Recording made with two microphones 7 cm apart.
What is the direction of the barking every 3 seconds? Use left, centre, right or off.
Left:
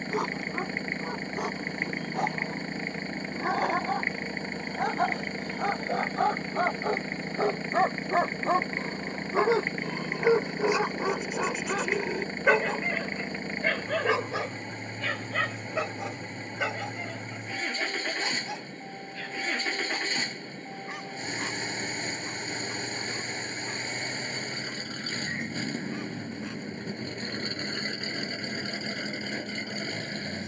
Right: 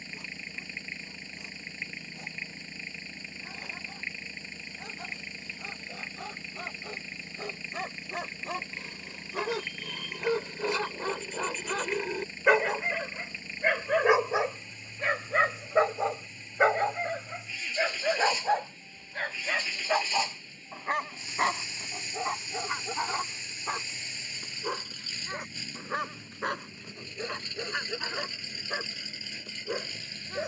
left, left, left, left, centre, right, right, right, right, right.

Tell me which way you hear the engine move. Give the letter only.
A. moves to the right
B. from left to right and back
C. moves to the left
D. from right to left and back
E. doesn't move
E.